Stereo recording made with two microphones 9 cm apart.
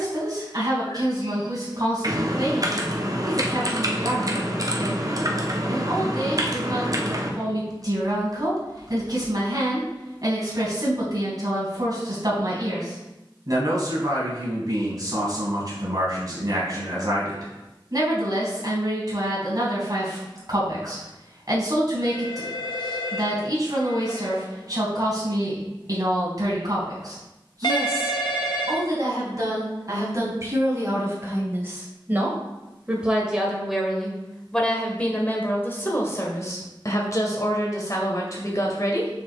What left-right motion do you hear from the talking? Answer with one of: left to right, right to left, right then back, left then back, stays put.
right to left.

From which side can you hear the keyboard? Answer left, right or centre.
right.